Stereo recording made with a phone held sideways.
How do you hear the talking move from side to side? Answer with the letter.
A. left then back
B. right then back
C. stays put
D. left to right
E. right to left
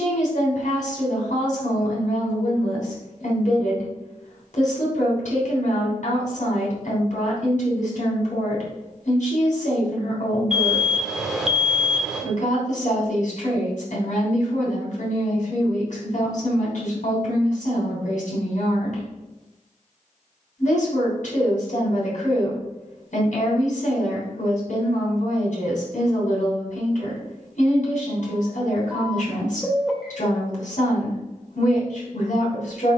C.